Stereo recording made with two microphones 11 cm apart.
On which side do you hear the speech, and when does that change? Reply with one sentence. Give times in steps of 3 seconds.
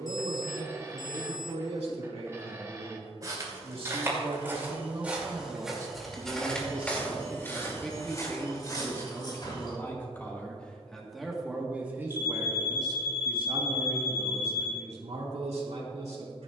In this clip you hear the speech on the right from 0 s, in the centre from 6 s and on the right from 12 s.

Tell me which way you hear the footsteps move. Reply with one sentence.
You can hear the footsteps travel towards the left.